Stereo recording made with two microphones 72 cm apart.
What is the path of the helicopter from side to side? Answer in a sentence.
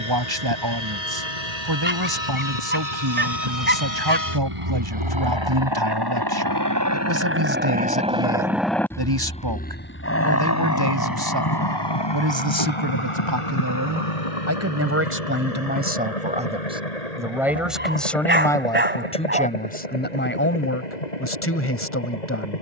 In this clip you hear the helicopter go from the right side to the left.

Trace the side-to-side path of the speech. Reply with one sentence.
In this clip you hear the speech move from right to left.